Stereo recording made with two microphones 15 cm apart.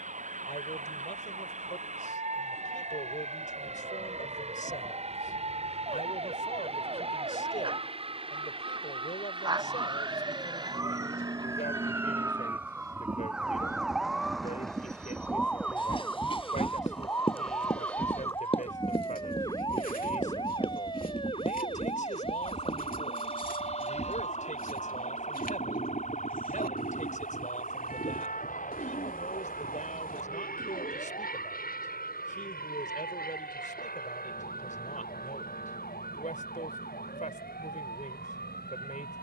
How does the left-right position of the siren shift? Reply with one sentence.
In this clip you hear the siren move to the left.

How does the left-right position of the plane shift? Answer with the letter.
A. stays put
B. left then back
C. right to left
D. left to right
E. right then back
C.